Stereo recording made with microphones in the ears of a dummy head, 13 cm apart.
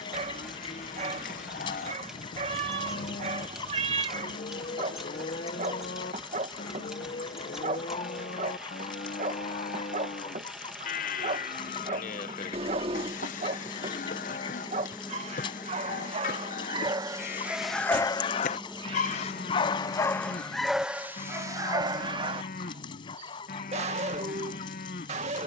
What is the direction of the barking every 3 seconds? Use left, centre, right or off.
right, right, right, right, right, right, left, right, right.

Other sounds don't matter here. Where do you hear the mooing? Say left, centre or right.
left.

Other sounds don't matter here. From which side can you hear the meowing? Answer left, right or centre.
right.